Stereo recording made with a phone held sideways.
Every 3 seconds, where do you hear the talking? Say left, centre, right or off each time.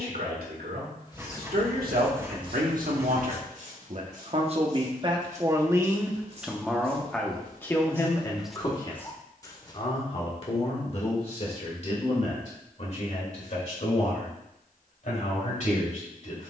right, right, centre, left, left, left.